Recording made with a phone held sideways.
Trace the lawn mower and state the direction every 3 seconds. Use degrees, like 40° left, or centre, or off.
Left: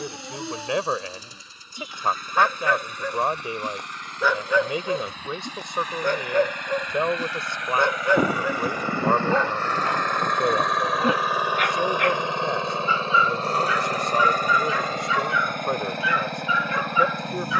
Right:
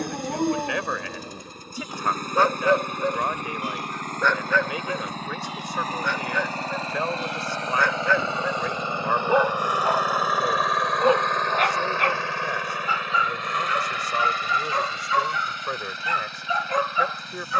60° right, 50° right, 30° right, centre, 40° left, 60° left.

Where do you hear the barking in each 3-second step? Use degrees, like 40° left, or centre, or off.
40° right, 10° left, 30° left, 30° right, 40° right, 40° right.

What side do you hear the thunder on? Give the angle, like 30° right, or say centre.
50° left.